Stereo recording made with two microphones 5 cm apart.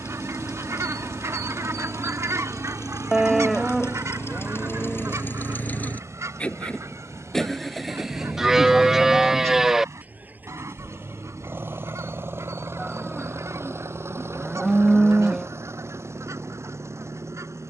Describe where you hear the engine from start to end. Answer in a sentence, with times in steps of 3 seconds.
In this clip you hear the engine on the left from 0 s, in the centre from 6 s and on the right from 9 s.